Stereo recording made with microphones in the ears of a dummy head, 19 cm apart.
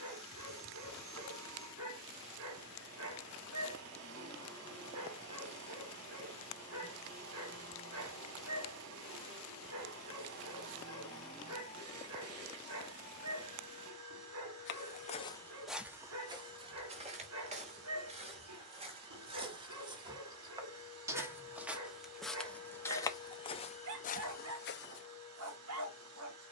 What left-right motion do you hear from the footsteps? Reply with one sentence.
In this clip you hear the footsteps move from left to right and back again.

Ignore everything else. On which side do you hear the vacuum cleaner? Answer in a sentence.
In this clip you hear the vacuum cleaner on the right.